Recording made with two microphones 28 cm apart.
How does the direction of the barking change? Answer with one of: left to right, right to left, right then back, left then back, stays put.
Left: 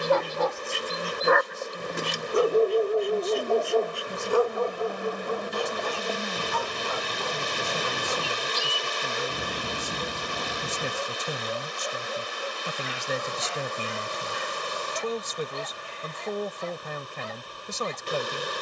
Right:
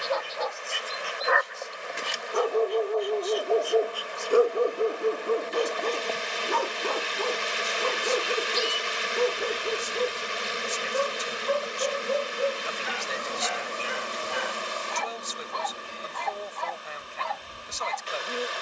left to right.